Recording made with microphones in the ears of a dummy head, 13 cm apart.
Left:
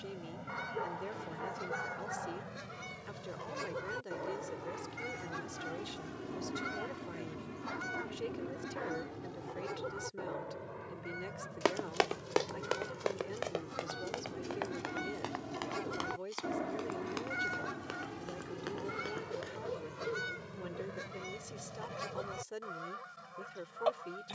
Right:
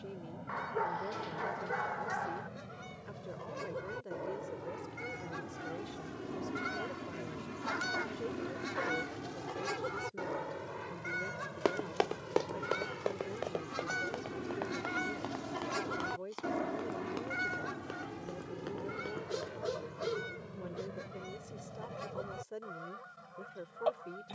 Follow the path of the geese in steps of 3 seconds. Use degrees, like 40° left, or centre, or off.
50° left, 30° left, 20° right, 70° right, 60° right, 10° right, 30° left, 40° left.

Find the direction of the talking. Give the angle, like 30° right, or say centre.
60° left.